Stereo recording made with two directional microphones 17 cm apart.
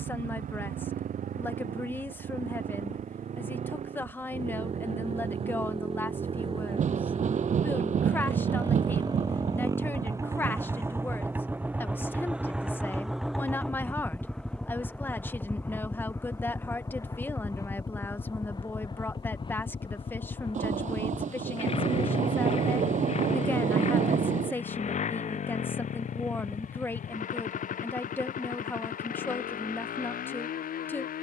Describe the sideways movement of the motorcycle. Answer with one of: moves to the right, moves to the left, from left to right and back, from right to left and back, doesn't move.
moves to the left.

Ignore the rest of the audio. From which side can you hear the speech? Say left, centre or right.
centre.